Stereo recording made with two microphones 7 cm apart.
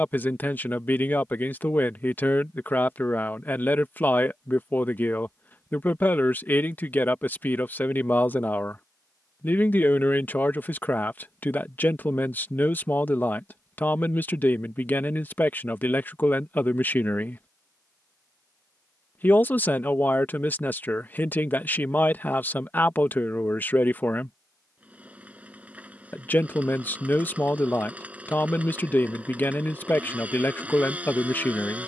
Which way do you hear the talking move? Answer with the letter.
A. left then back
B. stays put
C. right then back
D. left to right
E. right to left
B.